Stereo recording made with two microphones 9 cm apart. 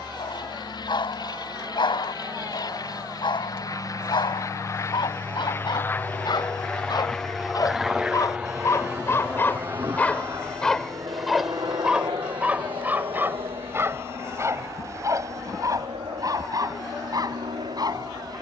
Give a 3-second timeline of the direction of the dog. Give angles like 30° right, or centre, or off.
70° left, 70° left, 50° left, 10° left, 30° right, 40° right.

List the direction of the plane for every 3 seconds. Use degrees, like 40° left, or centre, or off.
60° left, 40° left, centre, 40° right, 60° right, 70° right.